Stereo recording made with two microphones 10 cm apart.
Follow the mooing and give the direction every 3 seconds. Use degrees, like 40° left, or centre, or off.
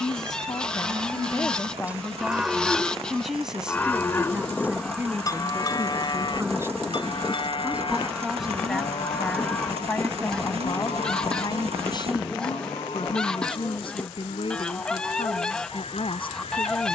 20° right, 30° left, 60° left, 70° left, 80° left, 80° left.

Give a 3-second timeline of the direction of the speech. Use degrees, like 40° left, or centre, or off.
30° left, 10° right, 10° right, 30° left, 60° left, 60° left.